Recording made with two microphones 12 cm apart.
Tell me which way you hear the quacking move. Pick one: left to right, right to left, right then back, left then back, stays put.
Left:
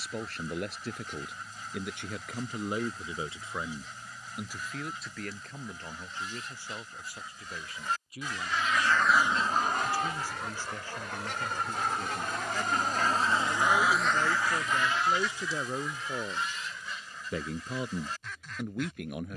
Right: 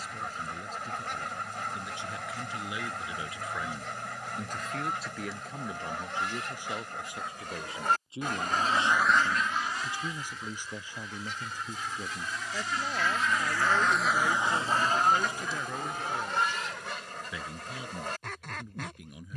left then back.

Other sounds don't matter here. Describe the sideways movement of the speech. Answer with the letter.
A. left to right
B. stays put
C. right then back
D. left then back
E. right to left
C.